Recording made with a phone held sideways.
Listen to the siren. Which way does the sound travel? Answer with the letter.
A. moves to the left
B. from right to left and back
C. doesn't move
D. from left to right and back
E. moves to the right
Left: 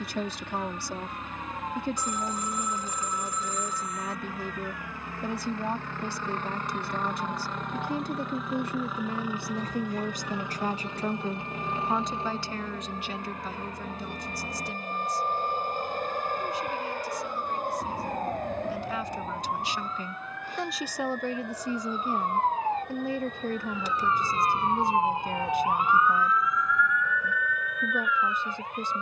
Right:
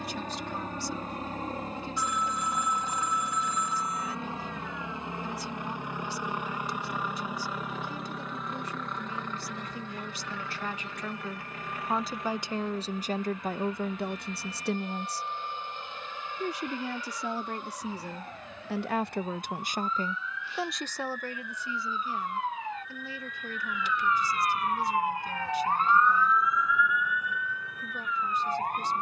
E.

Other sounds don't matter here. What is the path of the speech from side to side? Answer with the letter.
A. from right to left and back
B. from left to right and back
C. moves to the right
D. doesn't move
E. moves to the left
B.